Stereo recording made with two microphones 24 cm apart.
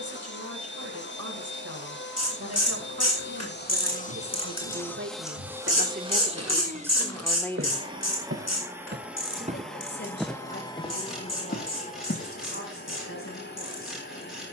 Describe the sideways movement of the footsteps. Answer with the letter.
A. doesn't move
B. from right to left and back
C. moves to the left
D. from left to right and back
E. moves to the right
C.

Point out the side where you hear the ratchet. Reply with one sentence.
You can hear the ratchet on the left.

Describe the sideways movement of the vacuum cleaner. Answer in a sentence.
You can hear the vacuum cleaner go right and come back.